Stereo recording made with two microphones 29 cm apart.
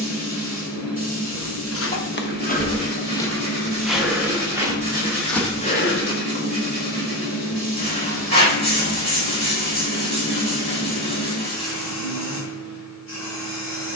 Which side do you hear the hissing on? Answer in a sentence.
In this clip you hear the hissing on the left.